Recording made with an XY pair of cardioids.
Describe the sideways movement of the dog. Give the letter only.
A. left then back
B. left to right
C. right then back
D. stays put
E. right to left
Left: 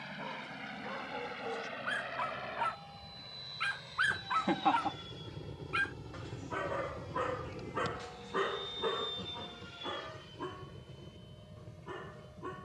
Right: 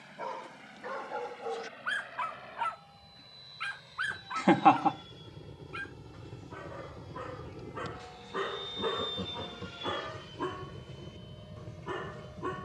A.